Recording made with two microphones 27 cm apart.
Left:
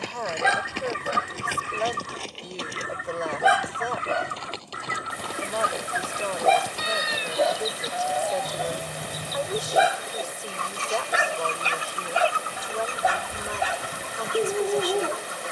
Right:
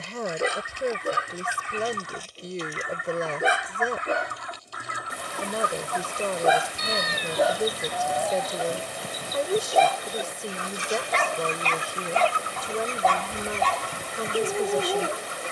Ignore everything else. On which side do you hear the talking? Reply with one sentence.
In this clip you hear the talking on the right.